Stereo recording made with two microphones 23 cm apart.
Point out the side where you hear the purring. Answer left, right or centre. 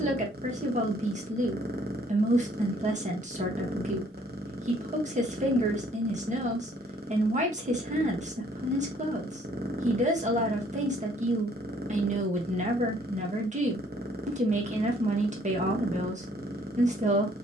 right.